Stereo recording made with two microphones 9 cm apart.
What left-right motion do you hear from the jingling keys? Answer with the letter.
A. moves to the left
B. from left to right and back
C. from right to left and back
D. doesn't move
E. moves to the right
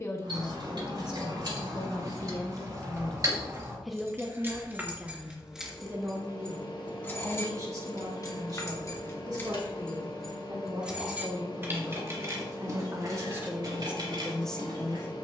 C.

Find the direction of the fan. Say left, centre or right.
left.